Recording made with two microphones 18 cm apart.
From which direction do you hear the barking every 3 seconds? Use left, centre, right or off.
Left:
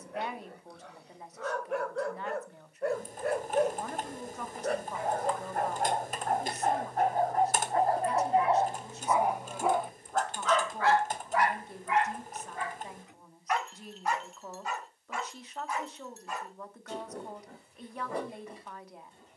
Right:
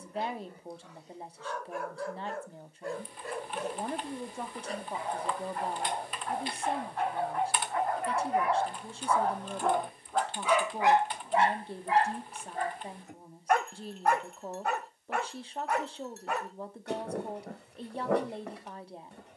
left, left, left, centre, right, right, right.